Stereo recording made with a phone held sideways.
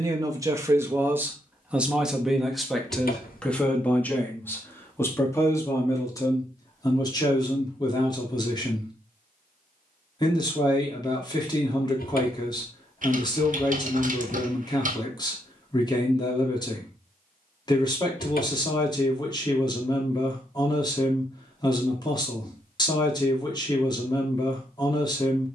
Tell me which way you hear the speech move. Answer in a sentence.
In this clip you hear the speech move to the left.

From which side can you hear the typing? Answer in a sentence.
In this clip you hear the typing on the right.